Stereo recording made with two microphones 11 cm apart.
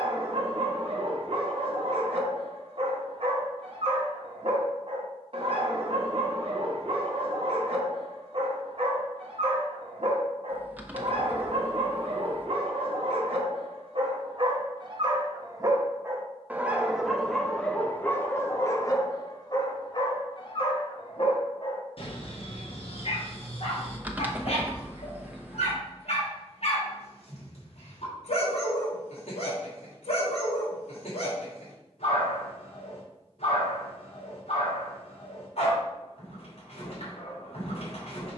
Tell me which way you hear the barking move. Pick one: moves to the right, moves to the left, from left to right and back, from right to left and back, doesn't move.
moves to the left.